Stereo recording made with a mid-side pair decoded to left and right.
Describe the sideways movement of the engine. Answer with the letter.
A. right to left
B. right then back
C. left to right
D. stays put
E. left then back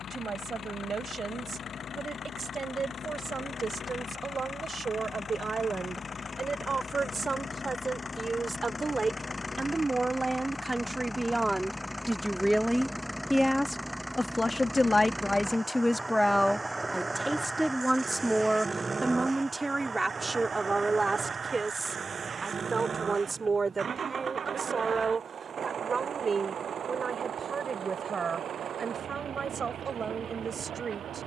C.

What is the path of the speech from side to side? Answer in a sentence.
In this clip you hear the speech move from right to left and back again.